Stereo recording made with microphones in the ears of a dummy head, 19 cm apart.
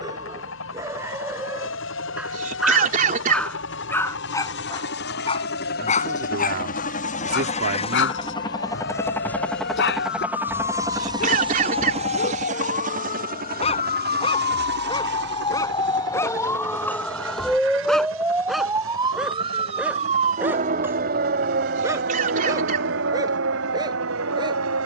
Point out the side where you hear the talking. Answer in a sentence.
You can hear the talking on the right.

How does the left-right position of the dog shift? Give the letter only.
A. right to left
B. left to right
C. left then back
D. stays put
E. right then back
C.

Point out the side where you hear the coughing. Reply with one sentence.
You can hear the coughing on the right.